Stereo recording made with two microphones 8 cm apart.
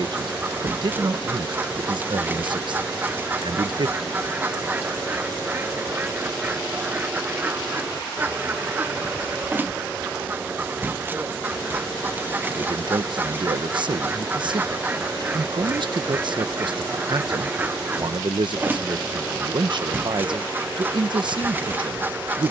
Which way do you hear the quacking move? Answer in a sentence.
You can hear the quacking stay in one place.